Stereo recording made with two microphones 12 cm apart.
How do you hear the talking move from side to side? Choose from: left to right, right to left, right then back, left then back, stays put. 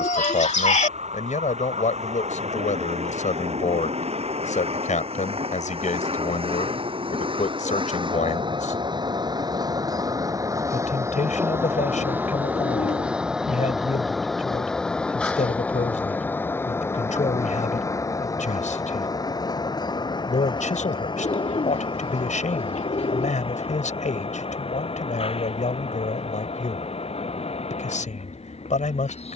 stays put.